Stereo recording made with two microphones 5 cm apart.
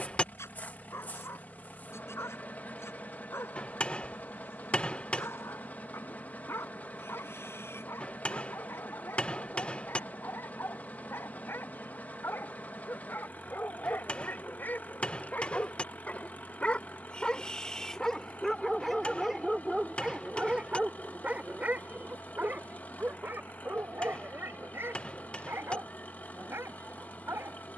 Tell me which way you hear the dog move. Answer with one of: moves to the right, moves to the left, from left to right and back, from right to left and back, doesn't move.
moves to the right.